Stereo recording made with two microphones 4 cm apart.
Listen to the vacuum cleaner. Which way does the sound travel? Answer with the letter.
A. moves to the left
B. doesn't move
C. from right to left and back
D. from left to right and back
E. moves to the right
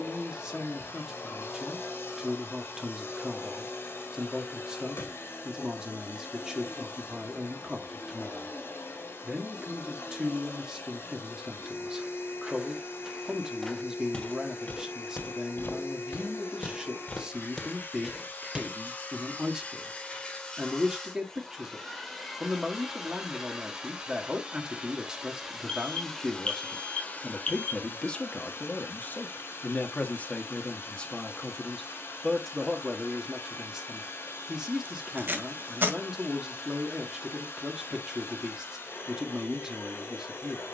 D.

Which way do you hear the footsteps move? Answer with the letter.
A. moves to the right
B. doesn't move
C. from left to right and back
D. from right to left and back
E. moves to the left
D.